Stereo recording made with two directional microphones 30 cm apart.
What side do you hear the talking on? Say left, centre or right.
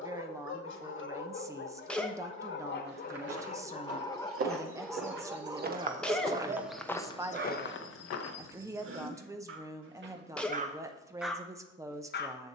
centre.